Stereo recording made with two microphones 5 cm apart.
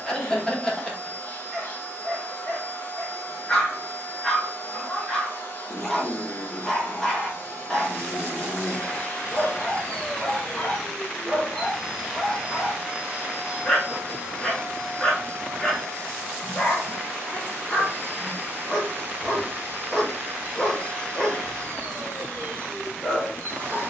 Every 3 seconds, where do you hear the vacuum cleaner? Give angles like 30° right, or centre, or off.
50° left, 50° left, 50° left, 20° left, 30° right, 50° right, 50° right, 50° right.